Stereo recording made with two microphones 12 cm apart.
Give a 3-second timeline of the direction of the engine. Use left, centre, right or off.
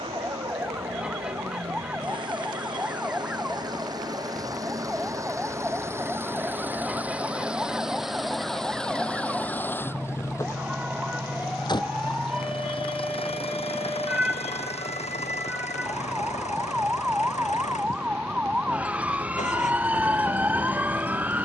right, right, centre, left, left, left, left.